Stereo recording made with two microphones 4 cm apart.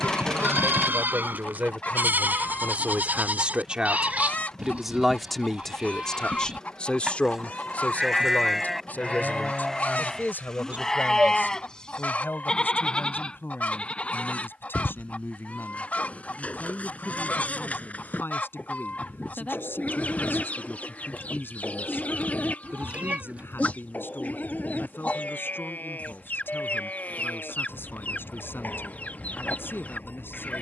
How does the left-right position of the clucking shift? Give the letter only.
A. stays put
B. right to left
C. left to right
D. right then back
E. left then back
A.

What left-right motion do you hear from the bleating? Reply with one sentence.
In this clip you hear the bleating move to the left.